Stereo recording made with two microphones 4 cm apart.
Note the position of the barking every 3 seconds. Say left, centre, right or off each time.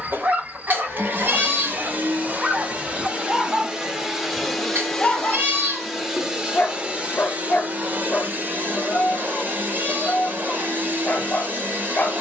right, centre, left, left.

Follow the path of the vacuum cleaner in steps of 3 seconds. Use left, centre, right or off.
right, centre, right, right.